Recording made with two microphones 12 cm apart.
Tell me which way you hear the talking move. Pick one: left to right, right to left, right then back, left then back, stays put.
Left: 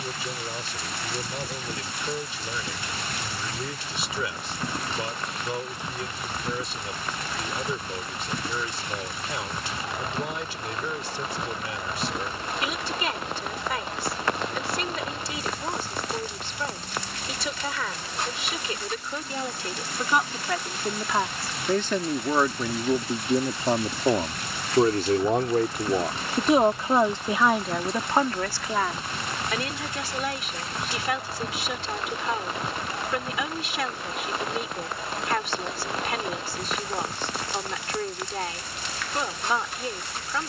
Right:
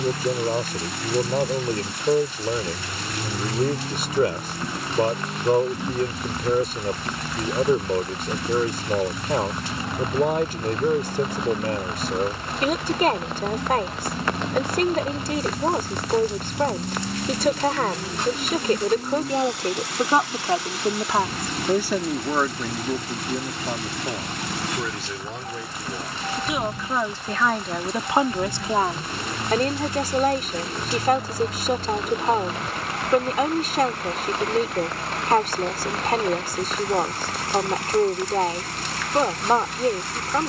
left then back.